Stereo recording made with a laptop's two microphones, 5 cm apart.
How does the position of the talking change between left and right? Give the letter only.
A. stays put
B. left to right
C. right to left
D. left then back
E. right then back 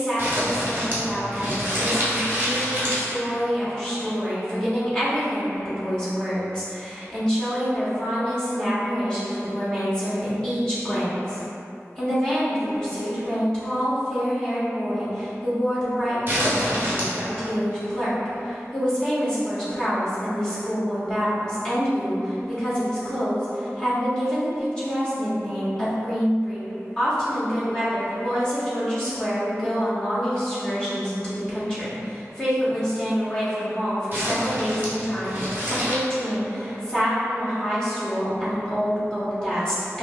A.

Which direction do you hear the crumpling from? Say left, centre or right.
right.